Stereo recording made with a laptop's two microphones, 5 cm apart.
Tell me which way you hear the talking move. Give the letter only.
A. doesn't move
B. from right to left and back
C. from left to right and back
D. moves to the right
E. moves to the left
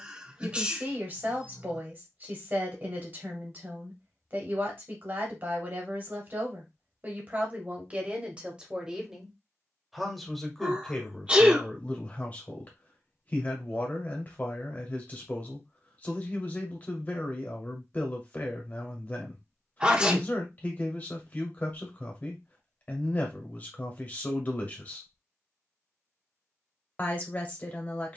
E.